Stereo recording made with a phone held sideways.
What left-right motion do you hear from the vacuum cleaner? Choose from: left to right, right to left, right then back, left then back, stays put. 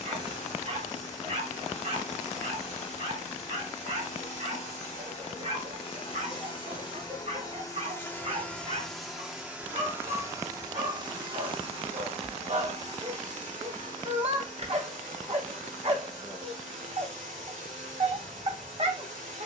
left to right.